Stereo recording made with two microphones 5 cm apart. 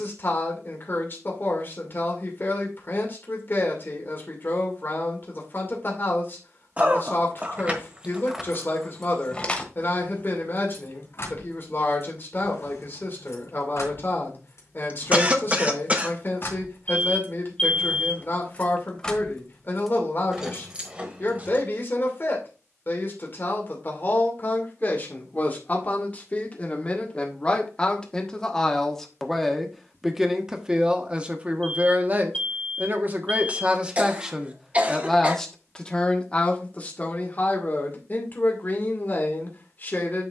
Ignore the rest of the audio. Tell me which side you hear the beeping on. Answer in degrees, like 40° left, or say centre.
20° left.